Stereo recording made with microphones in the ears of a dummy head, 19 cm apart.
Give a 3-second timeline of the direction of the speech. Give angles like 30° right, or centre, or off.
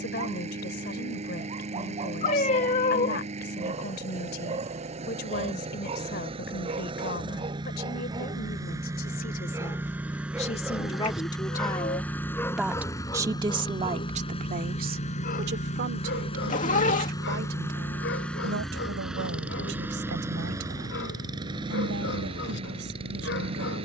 50° left, 50° left, 50° left, 30° left, 30° right, 60° right, 70° right, 80° right.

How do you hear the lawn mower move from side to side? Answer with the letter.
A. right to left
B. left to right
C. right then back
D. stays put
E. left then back
E.